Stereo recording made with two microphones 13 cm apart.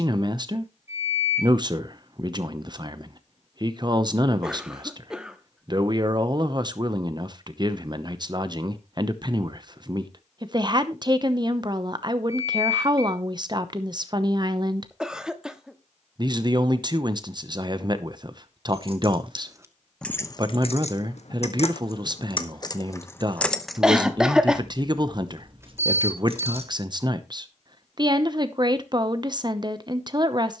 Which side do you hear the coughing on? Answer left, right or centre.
centre.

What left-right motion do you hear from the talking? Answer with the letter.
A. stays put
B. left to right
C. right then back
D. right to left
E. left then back
A.